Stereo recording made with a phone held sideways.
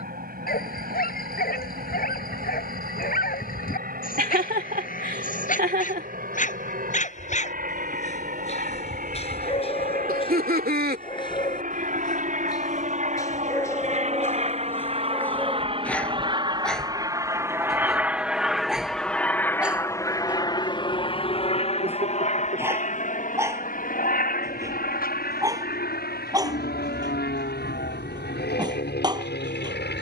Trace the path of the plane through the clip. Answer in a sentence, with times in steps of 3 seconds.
In this clip you hear the plane on the right from 0 s, in the centre from 18 s and on the left from 21 s.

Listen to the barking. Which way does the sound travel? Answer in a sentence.
You can hear the barking travel towards the right.